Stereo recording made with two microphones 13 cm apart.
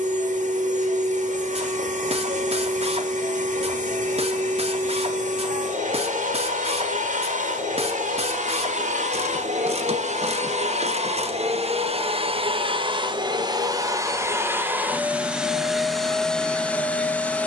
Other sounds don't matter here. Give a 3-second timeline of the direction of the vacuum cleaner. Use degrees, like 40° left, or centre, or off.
70° right, 70° right, 70° right, 60° right, 30° right, centre.